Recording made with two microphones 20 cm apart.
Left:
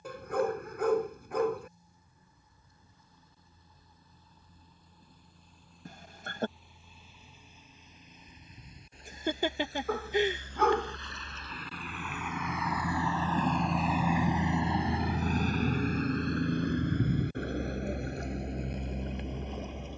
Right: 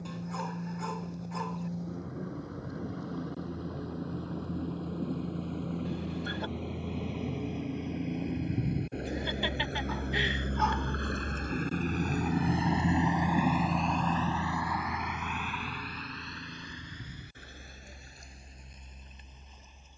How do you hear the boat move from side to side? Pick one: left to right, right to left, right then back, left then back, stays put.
right to left.